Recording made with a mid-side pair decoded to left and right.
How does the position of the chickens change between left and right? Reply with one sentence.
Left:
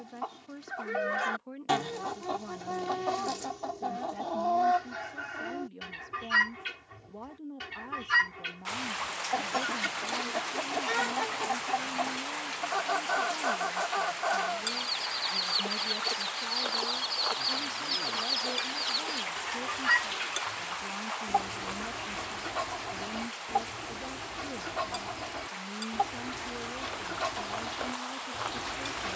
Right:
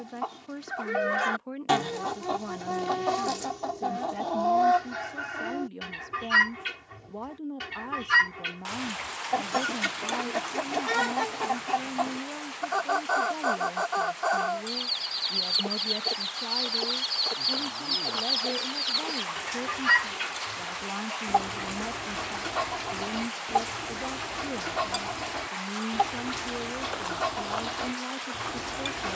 In this clip you hear the chickens stay put.